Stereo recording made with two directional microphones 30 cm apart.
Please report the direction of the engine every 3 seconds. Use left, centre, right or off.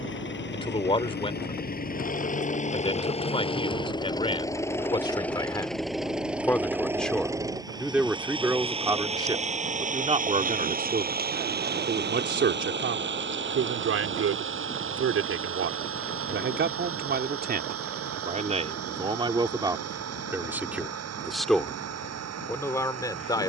left, centre, centre, right, right, right, right, right.